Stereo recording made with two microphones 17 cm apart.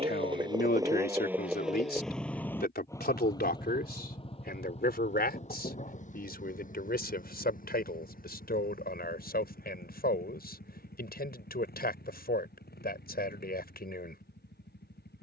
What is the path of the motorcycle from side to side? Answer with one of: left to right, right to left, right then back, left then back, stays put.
right to left.